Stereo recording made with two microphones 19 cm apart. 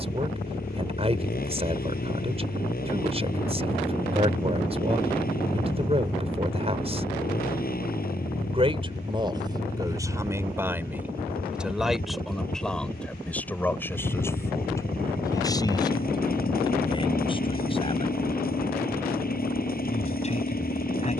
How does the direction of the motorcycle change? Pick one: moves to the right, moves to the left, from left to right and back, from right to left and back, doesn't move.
doesn't move.